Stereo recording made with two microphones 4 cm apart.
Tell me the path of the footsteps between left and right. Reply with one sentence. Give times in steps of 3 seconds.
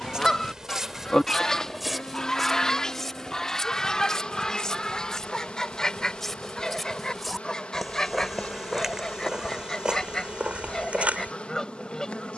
In this clip you hear the footsteps in the centre from 0 s and on the right from 9 s.